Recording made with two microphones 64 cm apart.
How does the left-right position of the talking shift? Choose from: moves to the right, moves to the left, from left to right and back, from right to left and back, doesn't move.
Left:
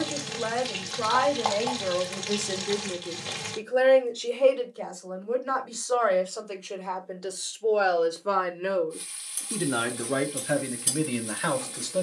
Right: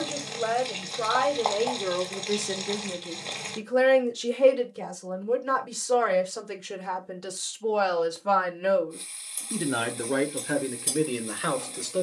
from left to right and back.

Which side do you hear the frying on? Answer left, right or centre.
left.